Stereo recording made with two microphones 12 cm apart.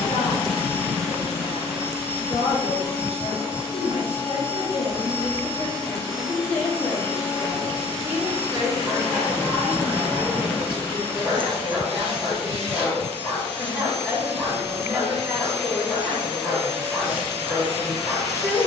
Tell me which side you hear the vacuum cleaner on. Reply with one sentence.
You can hear the vacuum cleaner on the left.